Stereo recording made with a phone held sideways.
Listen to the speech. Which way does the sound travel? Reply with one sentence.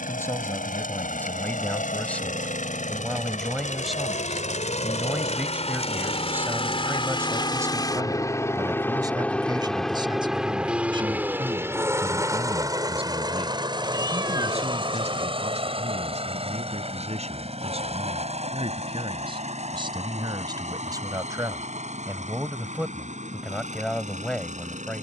You can hear the speech go right and come back.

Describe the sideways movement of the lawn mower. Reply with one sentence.
In this clip you hear the lawn mower move from left to right.